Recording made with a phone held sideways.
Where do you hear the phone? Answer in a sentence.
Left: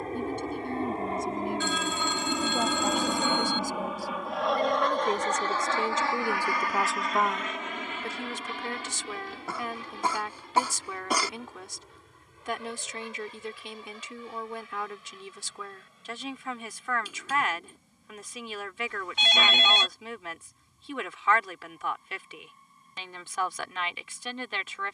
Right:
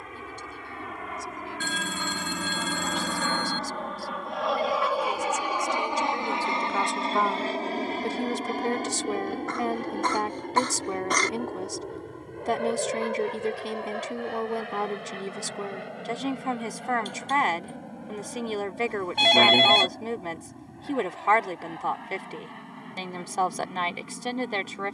In this clip you hear the phone on the right.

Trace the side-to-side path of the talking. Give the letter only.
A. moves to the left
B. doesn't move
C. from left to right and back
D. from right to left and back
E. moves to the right
E.